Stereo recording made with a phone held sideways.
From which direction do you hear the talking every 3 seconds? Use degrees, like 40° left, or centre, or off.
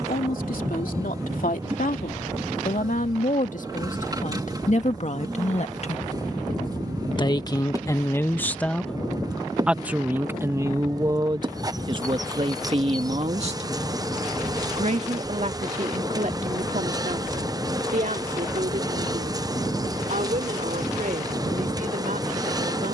70° left, 60° left, 20° left, 20° right, 40° right, 60° right, 60° right, 70° right.